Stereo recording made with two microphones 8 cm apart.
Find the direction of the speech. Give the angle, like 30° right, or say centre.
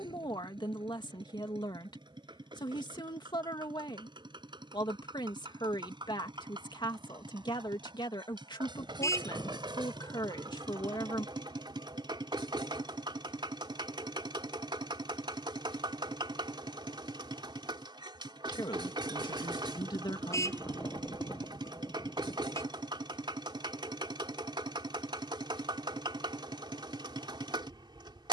60° left.